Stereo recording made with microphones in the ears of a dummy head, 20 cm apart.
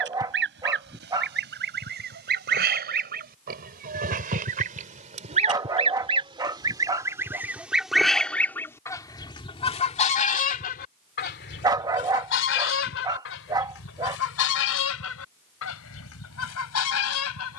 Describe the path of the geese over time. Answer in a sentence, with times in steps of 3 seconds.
In this clip you hear the geese on the right from 0 s, in the centre from 6 s and on the left from 9 s.